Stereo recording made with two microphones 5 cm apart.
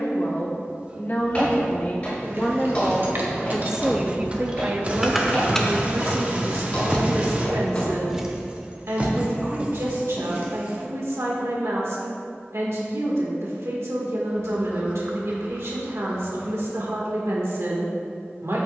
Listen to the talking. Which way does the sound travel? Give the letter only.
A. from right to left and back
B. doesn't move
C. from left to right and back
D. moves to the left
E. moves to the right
E.